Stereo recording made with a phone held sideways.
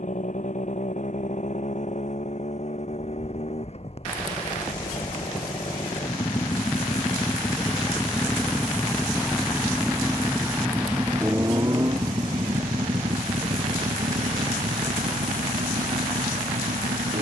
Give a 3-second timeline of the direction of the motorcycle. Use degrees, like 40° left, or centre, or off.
50° left, 40° left, 20° left, 10° right, 40° right, 60° right.